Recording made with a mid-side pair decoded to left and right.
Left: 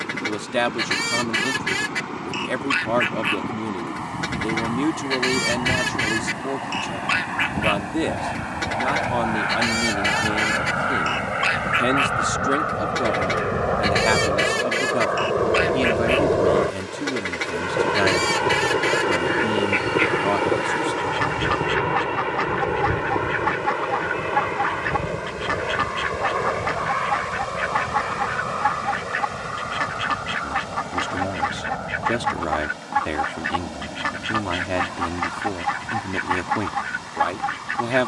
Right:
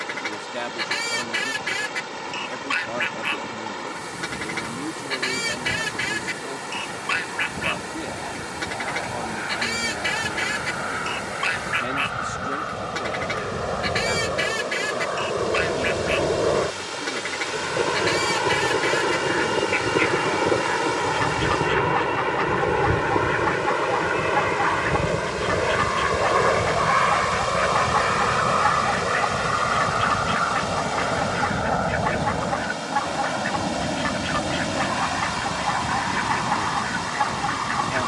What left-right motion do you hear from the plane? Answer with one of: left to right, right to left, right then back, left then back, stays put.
left to right.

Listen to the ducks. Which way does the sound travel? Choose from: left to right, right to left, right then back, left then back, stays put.
stays put.